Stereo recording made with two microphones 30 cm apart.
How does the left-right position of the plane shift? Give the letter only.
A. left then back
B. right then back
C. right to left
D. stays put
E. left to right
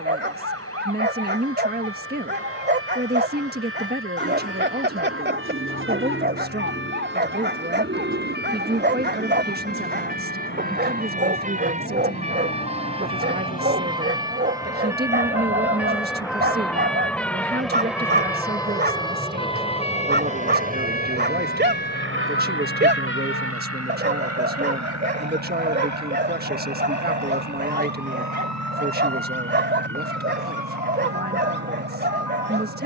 E.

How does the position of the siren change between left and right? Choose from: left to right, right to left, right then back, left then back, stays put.
right to left.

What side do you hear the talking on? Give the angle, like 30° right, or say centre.
30° right.